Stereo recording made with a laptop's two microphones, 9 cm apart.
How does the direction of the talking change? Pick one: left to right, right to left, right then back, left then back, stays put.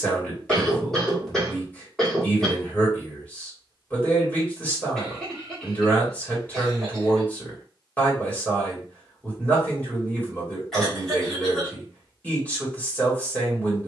stays put.